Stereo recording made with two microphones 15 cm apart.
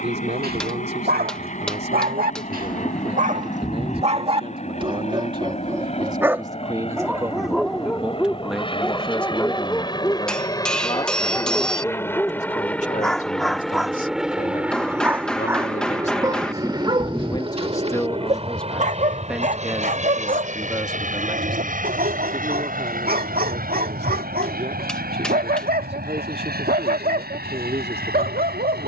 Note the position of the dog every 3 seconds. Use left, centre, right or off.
right, right, centre, centre, centre, right, right, right, right, right.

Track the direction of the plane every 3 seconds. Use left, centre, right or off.
left, left, left, left, centre, right, right, right, right, right.